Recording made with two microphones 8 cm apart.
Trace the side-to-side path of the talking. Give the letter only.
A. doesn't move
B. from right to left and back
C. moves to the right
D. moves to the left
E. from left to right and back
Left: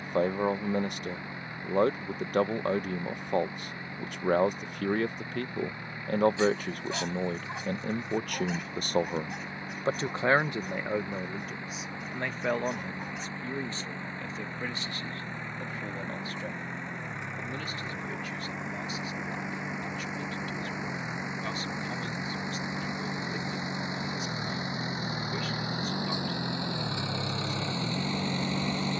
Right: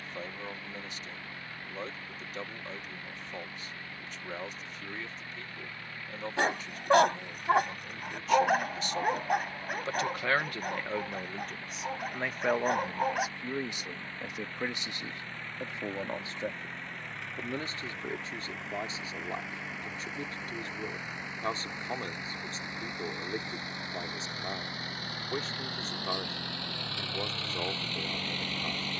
C.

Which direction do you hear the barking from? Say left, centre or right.
right.